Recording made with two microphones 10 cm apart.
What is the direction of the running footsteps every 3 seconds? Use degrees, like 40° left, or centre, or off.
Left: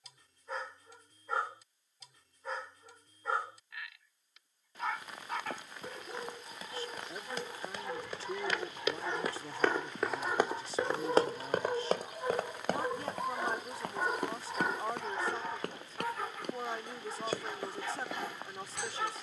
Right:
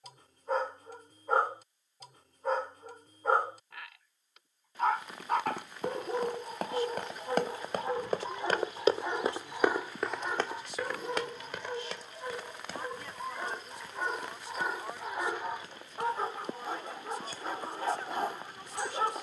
off, 70° right, 60° right, 20° left, 70° left, 80° left, 80° left.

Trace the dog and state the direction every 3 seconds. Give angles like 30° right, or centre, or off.
50° right, 50° right, 40° right, centre, 10° left, 30° right, 40° right.